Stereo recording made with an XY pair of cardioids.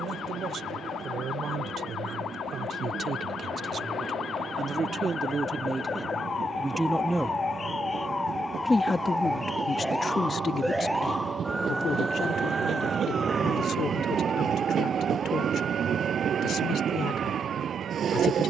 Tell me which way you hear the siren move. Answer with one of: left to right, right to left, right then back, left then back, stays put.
left to right.